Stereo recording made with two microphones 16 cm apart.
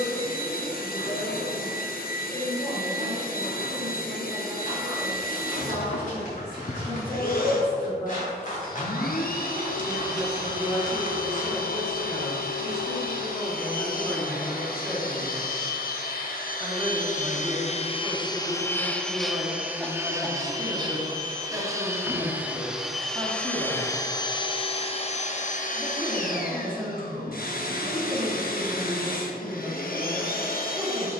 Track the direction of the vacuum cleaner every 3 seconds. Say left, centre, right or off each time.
left, left, left, left, left, left, centre, centre, left, left, left.